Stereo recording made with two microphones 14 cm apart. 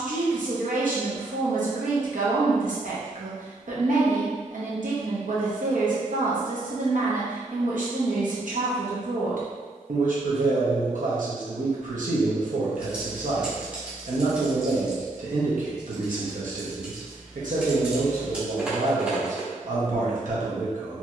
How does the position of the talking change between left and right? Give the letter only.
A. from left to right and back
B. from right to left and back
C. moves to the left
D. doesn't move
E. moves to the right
D.